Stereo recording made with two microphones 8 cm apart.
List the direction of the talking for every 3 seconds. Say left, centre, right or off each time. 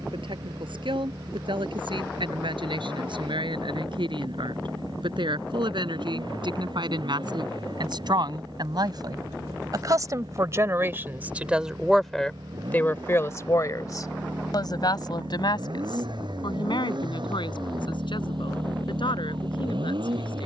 right, right, right, right, left, left, left.